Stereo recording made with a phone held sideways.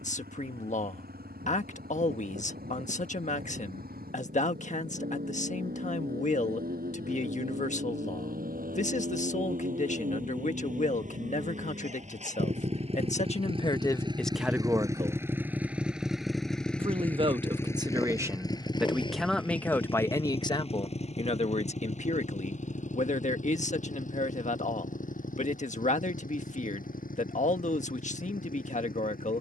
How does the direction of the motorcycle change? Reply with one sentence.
You can hear the motorcycle go from the right side to the left.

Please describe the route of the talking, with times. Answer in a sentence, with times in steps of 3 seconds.
In this clip you hear the talking on the left from 0 s, on the right from 15 s, in the centre from 18 s and on the left from 21 s.